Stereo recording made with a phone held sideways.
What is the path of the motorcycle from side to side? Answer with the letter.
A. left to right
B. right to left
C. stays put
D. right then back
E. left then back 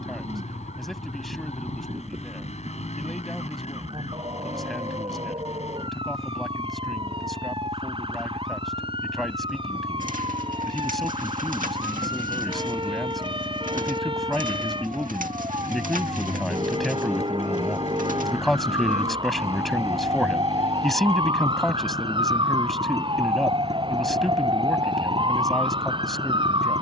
C.